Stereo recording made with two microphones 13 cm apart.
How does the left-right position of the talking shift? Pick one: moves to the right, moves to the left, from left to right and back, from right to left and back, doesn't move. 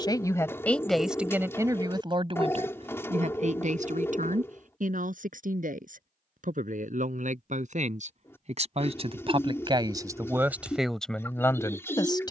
from left to right and back.